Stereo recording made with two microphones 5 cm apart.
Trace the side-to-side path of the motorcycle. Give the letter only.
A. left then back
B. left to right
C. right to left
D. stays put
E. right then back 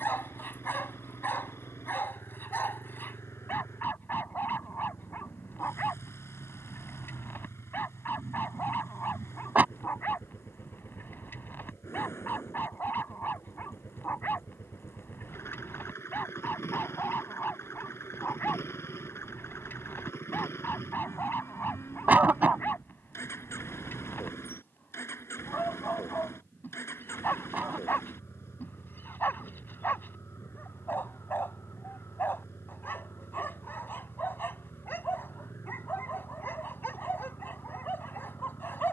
D.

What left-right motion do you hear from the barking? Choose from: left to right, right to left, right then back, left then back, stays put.
stays put.